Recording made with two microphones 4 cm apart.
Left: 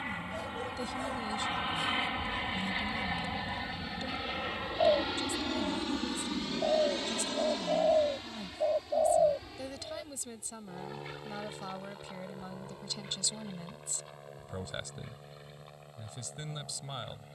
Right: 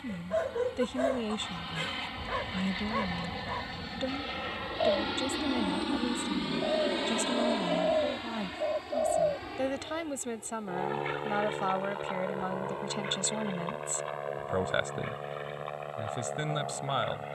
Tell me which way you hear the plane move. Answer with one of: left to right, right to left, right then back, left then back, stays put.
left to right.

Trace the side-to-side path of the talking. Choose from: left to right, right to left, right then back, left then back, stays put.
stays put.